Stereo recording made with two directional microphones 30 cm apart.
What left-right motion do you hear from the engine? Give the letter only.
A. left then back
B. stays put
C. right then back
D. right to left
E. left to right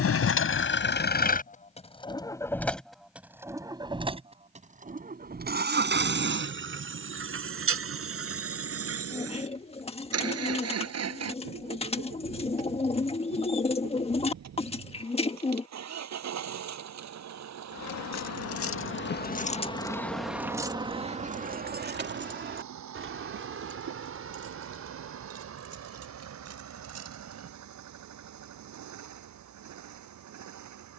E.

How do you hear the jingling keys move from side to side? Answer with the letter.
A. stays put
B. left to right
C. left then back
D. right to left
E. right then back
B.